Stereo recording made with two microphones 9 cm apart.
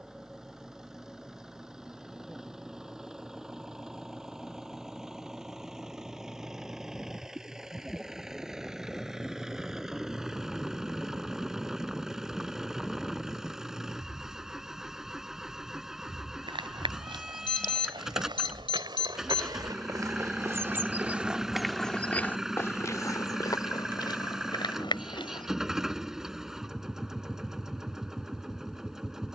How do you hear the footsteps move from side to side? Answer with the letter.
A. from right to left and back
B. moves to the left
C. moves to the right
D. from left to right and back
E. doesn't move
B.